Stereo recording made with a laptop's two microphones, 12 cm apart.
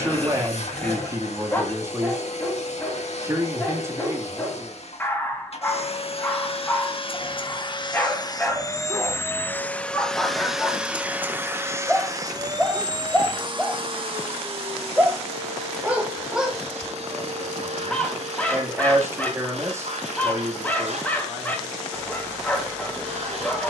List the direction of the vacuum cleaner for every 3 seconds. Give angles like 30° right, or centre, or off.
60° left, 60° left, 40° left, centre, 40° right, 60° right, 70° right, 70° right.